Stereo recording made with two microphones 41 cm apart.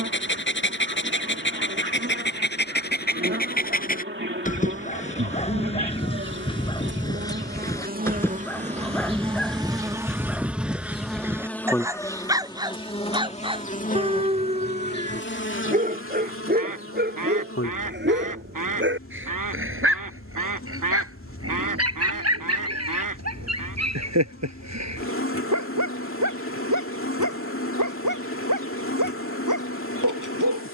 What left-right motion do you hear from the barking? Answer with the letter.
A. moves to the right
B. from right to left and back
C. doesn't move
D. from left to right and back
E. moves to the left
A.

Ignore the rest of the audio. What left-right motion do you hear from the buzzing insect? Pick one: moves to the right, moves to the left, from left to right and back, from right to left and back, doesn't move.
moves to the left.